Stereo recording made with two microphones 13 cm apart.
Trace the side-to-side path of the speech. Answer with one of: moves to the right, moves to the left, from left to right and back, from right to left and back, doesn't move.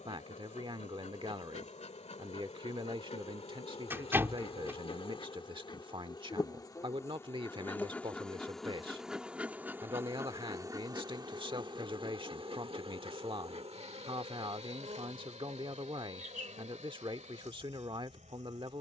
doesn't move.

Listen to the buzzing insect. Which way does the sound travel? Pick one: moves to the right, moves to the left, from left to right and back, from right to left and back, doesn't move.
moves to the right.